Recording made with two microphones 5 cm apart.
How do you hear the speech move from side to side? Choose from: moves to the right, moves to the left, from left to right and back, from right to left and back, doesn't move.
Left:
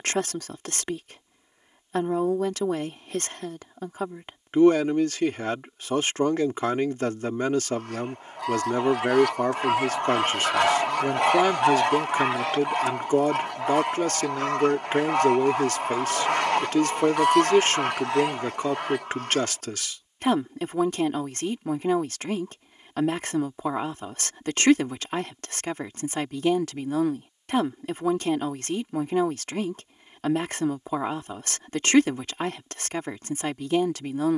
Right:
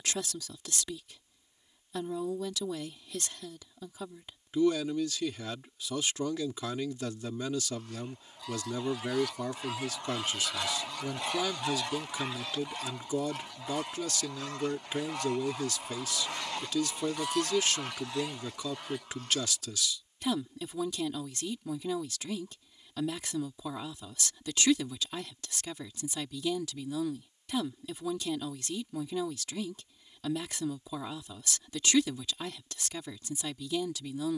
doesn't move.